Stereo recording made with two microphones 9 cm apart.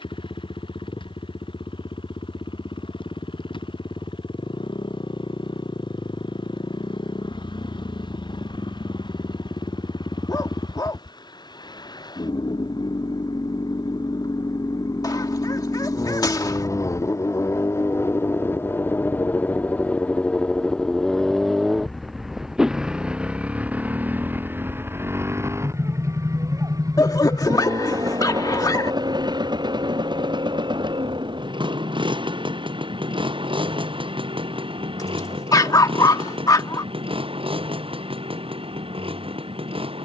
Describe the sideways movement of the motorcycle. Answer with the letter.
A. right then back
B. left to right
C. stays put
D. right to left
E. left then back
B.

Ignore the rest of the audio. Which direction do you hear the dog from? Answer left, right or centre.
left.